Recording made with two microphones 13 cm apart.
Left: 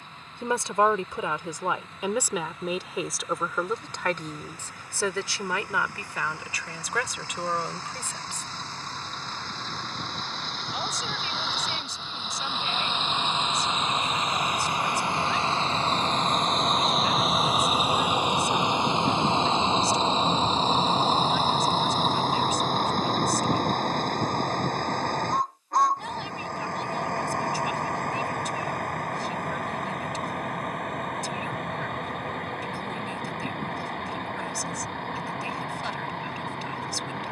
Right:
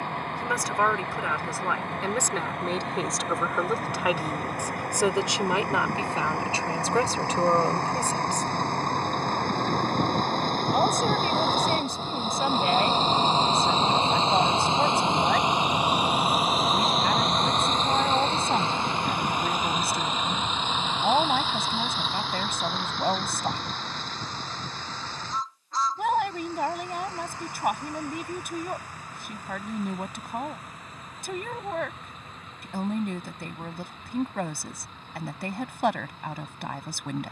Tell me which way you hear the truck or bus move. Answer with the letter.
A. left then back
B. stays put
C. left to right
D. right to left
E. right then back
D.